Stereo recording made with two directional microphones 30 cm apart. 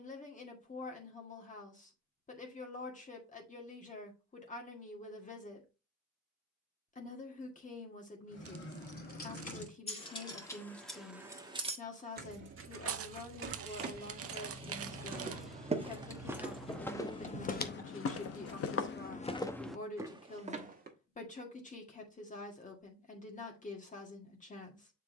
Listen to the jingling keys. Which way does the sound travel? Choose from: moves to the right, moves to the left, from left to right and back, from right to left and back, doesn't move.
from left to right and back.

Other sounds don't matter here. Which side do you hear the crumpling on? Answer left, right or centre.
right.